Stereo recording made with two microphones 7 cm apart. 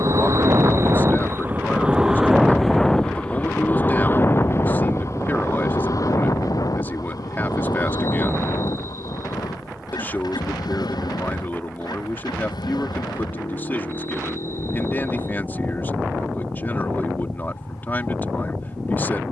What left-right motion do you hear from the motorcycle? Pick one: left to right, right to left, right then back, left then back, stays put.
right to left.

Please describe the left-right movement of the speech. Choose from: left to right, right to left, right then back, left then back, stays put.
stays put.